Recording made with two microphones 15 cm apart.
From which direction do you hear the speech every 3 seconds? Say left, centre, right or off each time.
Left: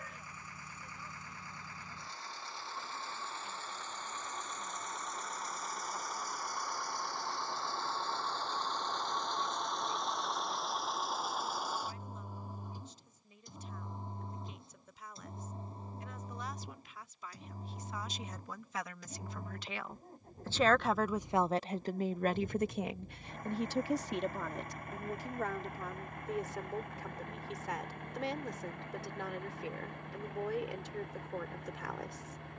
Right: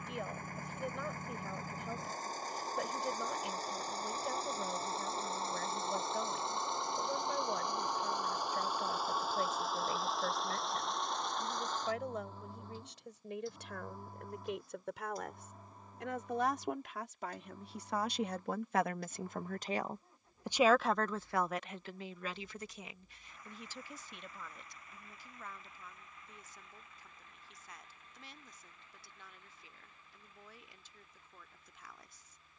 right, right, right, right, right, right, right, left, left, left, left.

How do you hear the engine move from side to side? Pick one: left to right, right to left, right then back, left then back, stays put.
right to left.